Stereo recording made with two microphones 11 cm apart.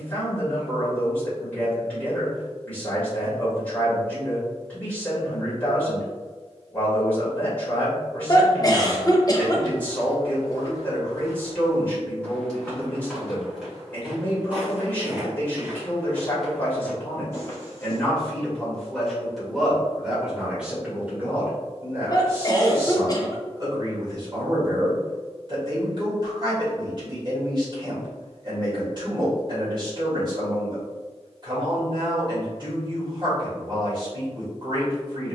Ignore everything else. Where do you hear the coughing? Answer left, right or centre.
left.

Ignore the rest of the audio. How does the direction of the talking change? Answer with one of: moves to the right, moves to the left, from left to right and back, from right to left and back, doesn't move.
moves to the right.